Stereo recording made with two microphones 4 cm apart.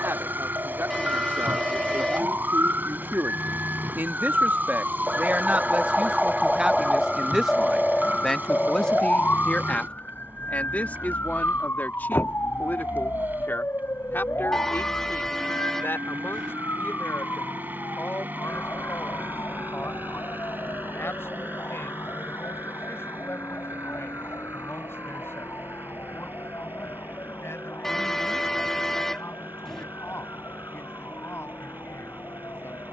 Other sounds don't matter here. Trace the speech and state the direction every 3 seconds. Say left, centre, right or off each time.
right, right, centre, left, left, left, left, left, left, left, left.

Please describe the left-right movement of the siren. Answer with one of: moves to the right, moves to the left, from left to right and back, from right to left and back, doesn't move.
moves to the left.